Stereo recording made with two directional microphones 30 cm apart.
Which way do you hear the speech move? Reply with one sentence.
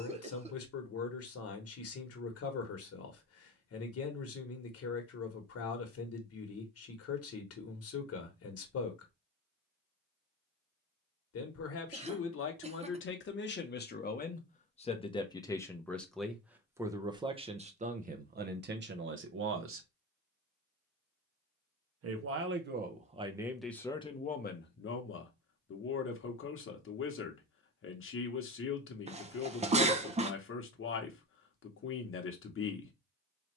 In this clip you hear the speech go right and come back.